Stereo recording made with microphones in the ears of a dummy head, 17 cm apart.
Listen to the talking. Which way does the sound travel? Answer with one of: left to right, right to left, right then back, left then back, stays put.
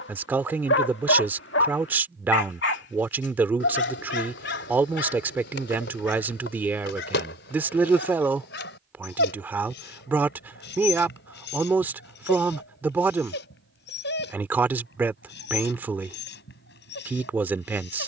stays put.